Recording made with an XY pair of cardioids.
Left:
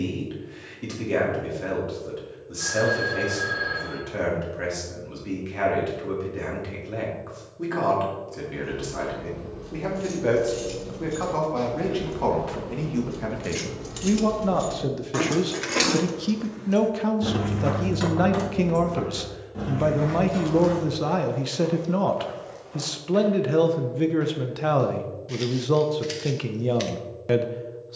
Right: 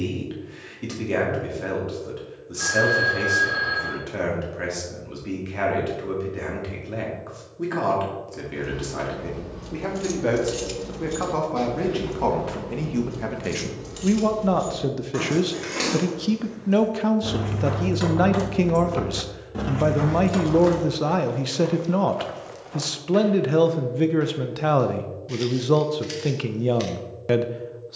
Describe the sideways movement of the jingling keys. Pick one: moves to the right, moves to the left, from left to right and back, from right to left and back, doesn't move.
from right to left and back.